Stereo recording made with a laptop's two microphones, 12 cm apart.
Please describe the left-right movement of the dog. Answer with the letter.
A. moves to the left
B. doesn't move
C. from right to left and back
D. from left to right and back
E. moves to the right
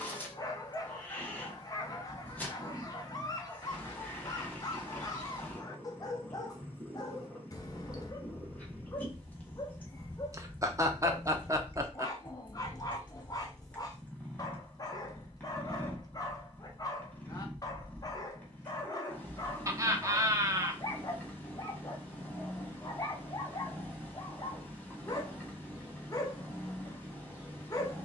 B.